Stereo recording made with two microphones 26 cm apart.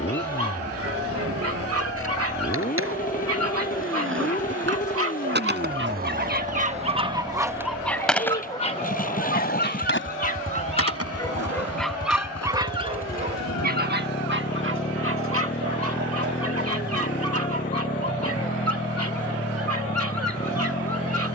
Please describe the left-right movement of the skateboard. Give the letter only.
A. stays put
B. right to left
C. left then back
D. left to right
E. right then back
B.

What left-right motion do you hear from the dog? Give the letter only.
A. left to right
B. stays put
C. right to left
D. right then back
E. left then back
E.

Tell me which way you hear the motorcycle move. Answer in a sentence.
In this clip you hear the motorcycle stay put.